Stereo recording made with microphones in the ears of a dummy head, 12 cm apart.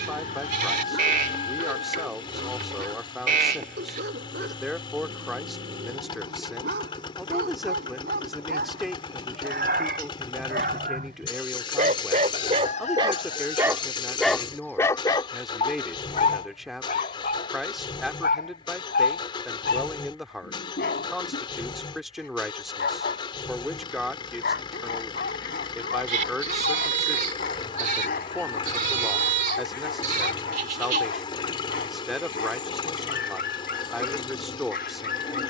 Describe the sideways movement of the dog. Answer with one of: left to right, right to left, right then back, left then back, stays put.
right to left.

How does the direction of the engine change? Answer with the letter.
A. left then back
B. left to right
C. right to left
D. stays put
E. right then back
D.